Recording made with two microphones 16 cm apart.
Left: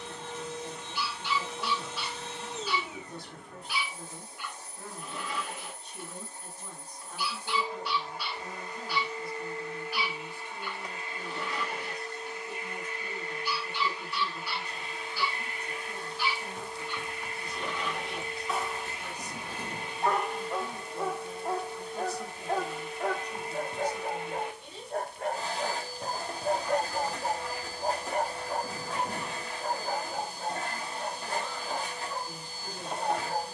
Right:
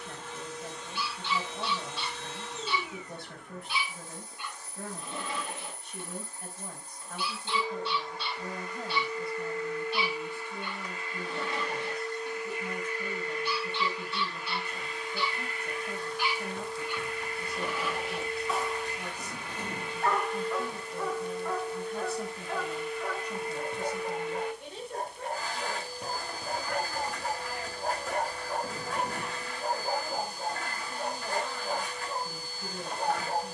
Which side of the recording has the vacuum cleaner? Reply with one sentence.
You can hear the vacuum cleaner on the left.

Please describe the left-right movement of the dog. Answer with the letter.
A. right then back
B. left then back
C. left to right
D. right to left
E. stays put
B.